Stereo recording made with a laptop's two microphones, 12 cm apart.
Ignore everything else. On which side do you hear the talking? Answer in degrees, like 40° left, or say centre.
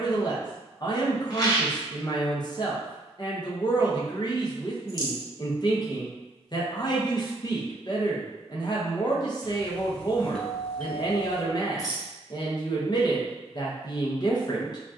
40° left.